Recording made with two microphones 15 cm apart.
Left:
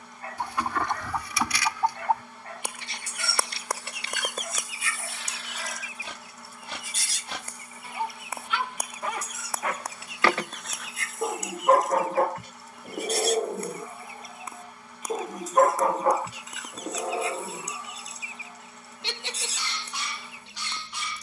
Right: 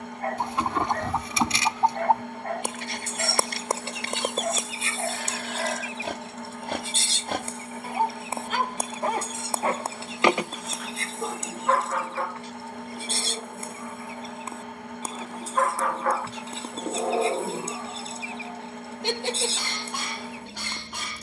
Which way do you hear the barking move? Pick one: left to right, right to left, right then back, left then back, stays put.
left then back.